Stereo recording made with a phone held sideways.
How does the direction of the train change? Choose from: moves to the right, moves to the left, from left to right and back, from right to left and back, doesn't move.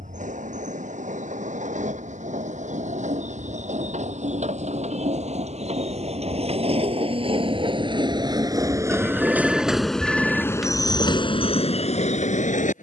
moves to the left.